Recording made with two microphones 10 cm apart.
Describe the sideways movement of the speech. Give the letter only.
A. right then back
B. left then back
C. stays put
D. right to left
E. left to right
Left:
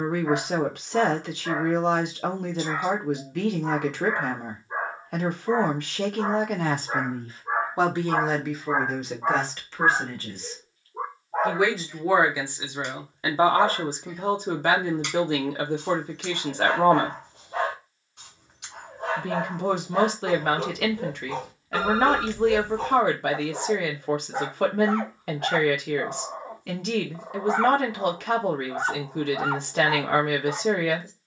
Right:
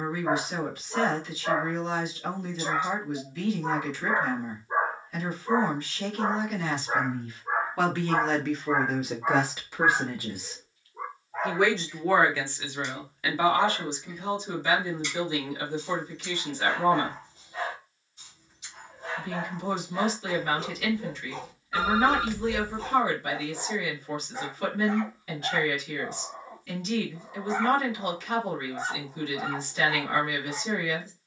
A.